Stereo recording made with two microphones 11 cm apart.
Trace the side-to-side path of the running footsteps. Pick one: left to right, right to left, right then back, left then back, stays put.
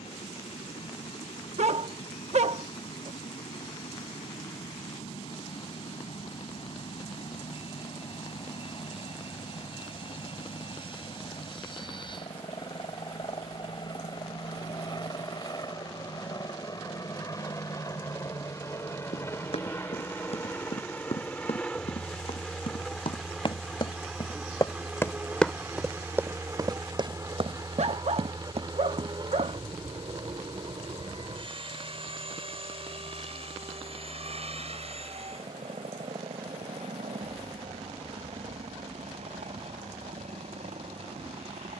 left to right.